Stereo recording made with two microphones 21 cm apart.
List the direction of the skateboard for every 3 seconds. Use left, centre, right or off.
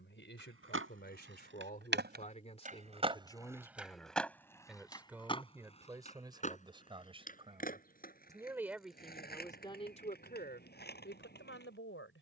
right, centre, left, left.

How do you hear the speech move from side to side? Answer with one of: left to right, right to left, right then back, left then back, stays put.
right then back.